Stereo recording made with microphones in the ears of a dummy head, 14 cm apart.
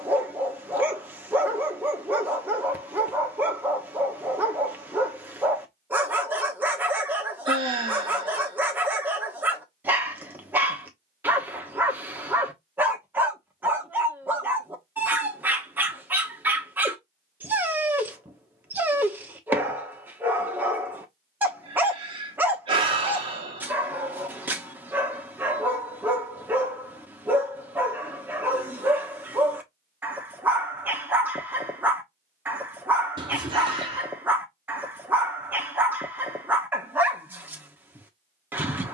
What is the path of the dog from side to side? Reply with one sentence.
You can hear the dog stay put.